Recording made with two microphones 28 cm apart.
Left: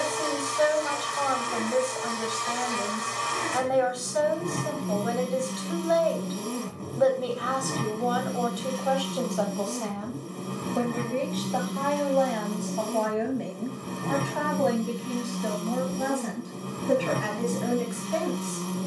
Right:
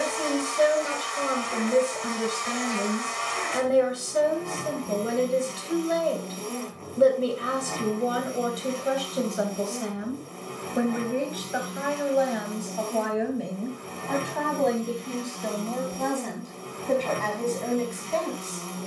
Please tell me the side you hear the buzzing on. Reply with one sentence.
In this clip you hear the buzzing on the left.